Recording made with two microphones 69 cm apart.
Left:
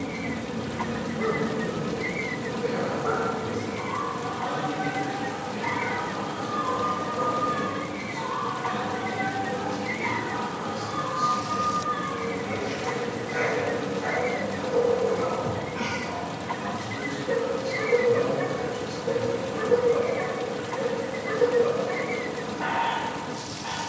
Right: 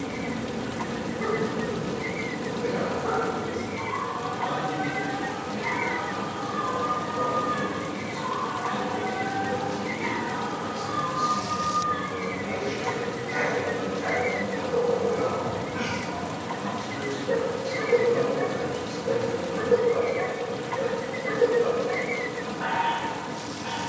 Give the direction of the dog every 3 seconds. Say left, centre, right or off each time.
left, left, centre, right, right, left, left, left.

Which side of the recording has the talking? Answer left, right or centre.
right.